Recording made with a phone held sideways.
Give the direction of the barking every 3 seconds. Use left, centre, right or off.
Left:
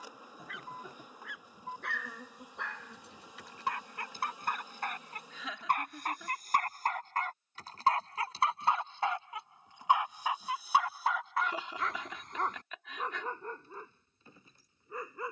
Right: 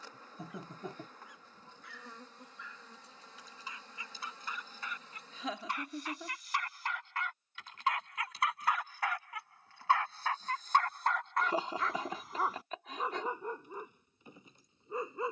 left, left, left, centre, centre.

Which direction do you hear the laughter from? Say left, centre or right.
right.